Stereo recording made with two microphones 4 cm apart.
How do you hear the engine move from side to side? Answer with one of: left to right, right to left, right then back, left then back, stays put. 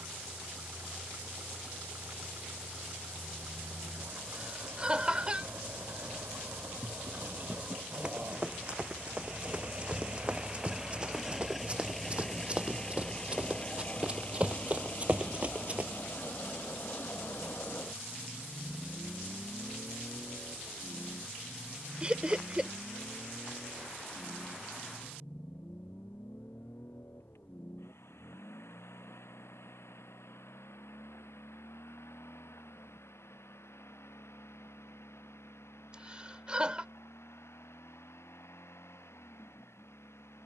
right to left.